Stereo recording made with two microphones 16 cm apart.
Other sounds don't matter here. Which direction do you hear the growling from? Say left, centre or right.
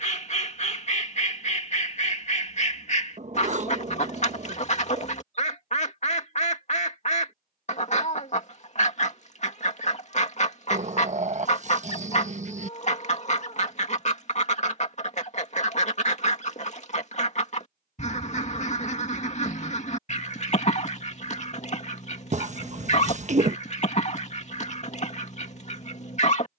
right.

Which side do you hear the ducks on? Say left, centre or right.
left.